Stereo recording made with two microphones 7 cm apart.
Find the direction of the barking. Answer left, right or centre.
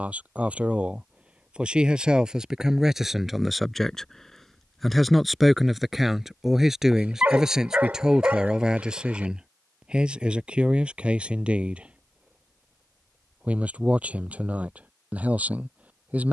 right.